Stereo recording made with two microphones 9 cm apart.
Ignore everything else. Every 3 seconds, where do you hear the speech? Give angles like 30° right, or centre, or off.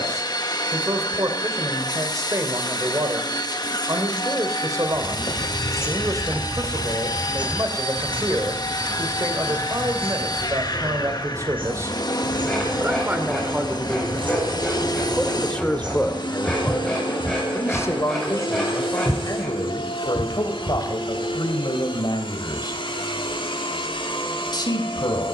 40° right, 40° right, 40° right, 40° right, 20° right, 20° left, 40° left, 50° left, 50° left.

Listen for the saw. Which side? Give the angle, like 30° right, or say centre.
10° left.